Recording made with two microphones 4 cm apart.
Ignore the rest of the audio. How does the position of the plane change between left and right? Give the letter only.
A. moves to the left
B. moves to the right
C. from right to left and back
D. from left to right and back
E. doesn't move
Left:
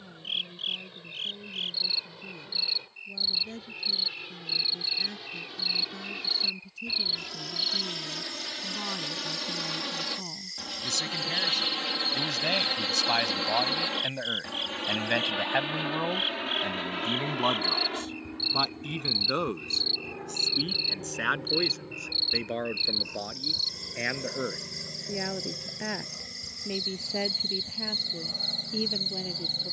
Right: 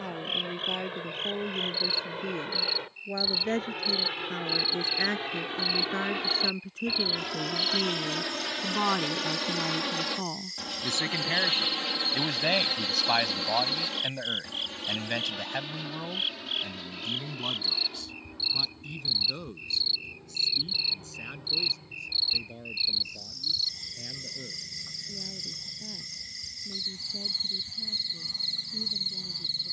A.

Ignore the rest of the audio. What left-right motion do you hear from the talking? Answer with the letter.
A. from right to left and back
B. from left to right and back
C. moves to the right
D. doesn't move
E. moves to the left
E.